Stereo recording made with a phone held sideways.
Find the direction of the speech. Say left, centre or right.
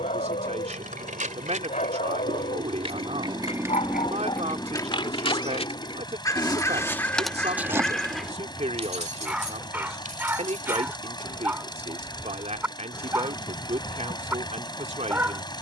right.